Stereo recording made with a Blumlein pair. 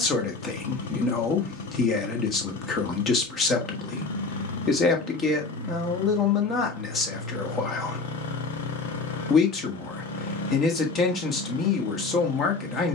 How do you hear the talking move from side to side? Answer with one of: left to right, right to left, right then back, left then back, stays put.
stays put.